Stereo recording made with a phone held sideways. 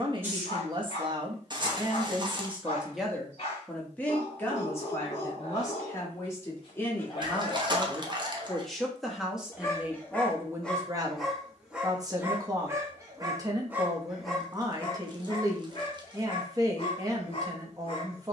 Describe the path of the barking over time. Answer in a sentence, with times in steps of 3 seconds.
In this clip you hear the barking on the left from 0 s, in the centre from 9 s and on the left from 15 s.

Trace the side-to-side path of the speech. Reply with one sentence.
In this clip you hear the speech go left and come back.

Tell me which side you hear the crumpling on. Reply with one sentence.
You can hear the crumpling on the right.